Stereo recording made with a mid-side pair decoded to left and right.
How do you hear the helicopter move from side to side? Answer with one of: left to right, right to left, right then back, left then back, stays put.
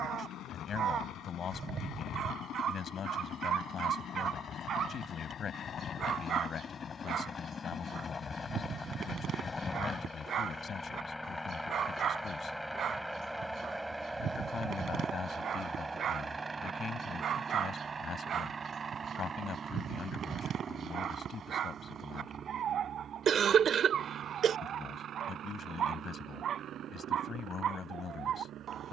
left to right.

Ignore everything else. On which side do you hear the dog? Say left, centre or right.
right.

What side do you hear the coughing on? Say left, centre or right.
right.